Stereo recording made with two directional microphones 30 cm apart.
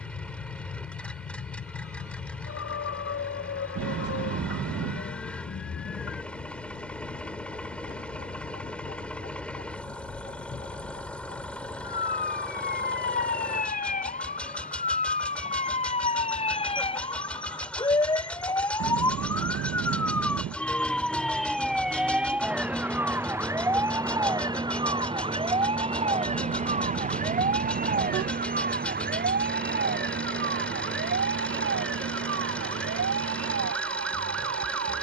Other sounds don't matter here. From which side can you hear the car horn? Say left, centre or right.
right.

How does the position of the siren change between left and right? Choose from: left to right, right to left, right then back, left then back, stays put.
left to right.